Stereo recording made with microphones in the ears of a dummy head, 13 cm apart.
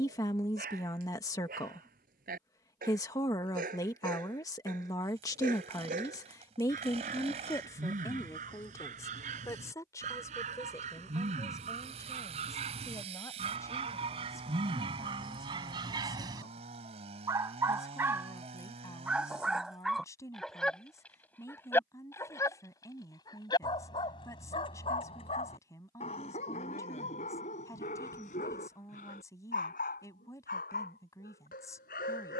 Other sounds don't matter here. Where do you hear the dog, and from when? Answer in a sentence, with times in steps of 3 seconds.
You can hear the dog on the right from 0 s, in the centre from 18 s and on the left from 21 s.